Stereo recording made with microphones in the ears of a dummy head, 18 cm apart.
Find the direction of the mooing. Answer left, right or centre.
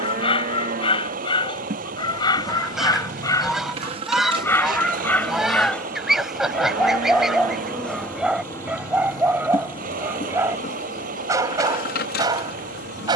right.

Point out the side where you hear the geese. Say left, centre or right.
centre.